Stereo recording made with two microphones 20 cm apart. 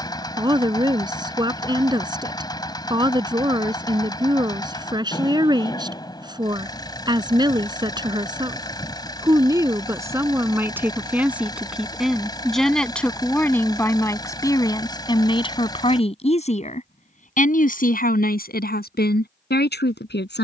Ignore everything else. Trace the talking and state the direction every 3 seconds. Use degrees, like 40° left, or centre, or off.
20° right, 20° right, 20° right, 10° right, 10° left, 30° left, 60° left.